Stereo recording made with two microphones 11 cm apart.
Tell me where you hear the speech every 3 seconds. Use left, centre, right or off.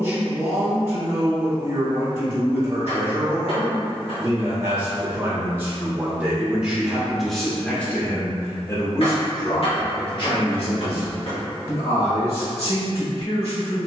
right, right, centre, left, left.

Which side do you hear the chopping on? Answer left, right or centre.
left.